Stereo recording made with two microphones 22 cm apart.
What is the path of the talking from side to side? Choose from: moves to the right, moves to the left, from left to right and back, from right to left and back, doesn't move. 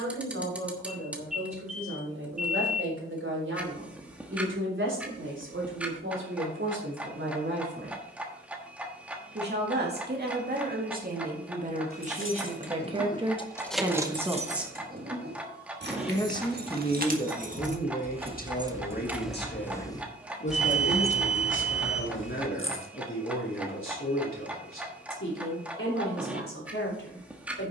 moves to the left.